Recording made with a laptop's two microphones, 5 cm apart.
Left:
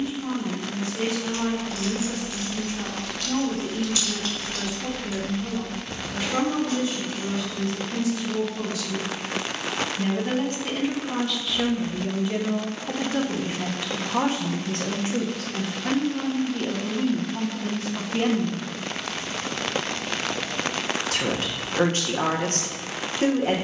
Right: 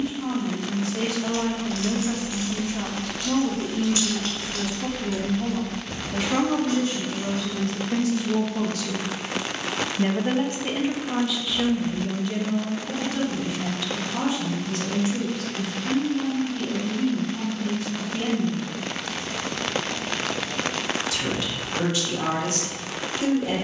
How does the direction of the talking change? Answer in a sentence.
In this clip you hear the talking go from the right side to the left.